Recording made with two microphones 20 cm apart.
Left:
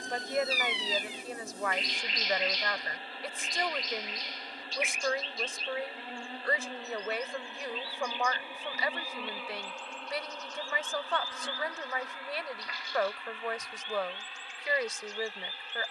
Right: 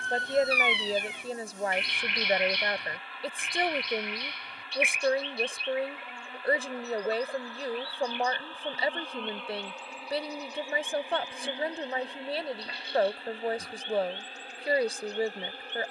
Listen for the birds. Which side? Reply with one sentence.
You can hear the birds on the right.